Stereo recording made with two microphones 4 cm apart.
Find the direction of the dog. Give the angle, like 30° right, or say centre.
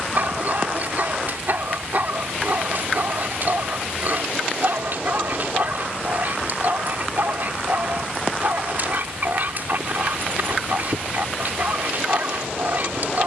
50° right.